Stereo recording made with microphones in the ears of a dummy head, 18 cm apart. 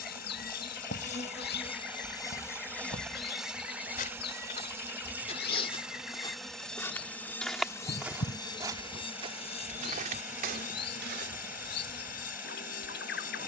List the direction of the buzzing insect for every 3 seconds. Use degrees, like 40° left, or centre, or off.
30° left, 10° right, 10° left, 40° left, 40° left.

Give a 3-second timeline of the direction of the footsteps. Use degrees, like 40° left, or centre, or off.
50° left, 40° left, centre, 40° right, off.